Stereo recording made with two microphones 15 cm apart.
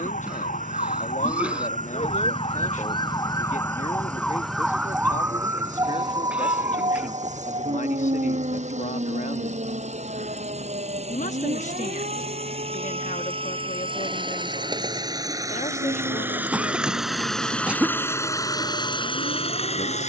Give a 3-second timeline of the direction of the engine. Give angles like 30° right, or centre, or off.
60° right, 60° right, 50° right, 50° right, 40° right, 10° right, 30° left.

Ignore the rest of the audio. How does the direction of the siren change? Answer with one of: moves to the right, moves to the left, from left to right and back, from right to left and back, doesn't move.
moves to the right.